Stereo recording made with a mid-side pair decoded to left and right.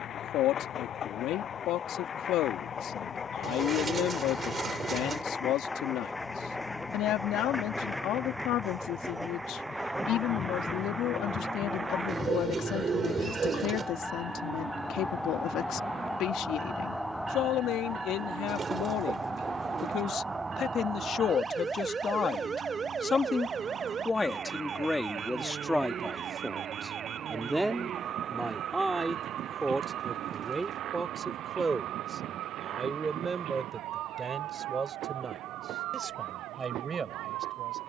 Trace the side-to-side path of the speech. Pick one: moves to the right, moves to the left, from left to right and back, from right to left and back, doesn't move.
moves to the right.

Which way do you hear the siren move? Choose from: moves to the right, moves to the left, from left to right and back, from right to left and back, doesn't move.
moves to the right.